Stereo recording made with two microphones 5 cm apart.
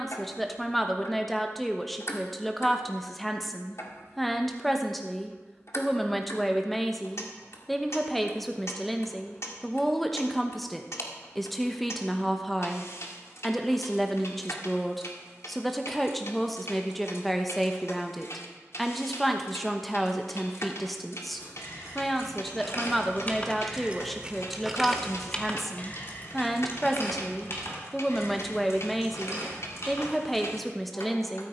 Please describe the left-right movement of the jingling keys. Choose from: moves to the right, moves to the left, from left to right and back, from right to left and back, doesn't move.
from left to right and back.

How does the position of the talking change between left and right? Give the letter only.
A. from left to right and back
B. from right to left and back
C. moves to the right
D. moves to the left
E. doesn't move
E.